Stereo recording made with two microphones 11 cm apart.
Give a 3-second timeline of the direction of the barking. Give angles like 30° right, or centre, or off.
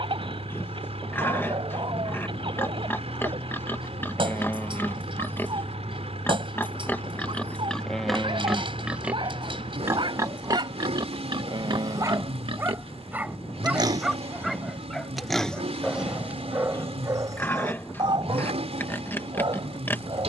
60° right, 60° right, 60° right, 50° right, 10° right, 20° right, 50° right.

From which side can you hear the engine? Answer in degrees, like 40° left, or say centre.
80° right.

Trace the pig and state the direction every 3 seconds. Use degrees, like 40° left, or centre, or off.
20° left, 20° left, 10° left, 40° right, 40° right, 10° left, 20° left.